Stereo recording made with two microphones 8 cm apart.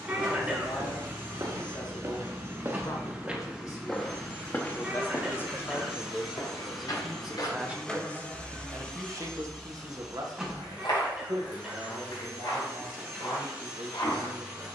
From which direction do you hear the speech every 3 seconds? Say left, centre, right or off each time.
left, left, centre, right, right.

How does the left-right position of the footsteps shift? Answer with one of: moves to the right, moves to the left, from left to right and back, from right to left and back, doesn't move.
moves to the left.